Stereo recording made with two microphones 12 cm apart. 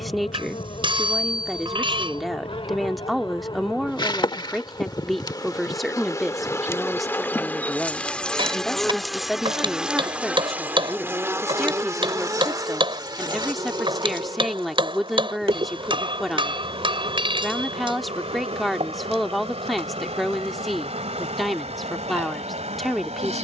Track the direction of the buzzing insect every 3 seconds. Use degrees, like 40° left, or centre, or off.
50° left, 40° left, 10° left, 10° right, 40° right, 50° right, 60° right, 70° right.